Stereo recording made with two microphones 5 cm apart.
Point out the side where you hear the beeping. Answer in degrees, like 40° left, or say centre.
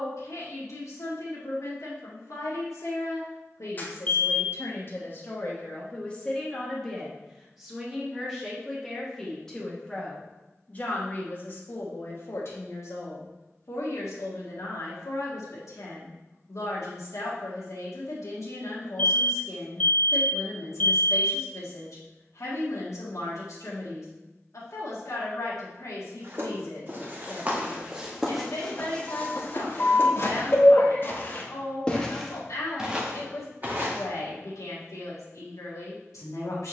30° left.